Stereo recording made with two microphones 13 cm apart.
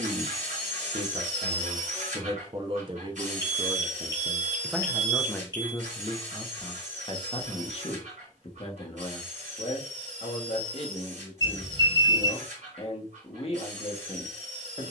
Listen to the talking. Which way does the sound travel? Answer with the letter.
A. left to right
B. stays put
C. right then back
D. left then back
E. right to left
E.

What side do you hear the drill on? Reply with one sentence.
You can hear the drill on the right.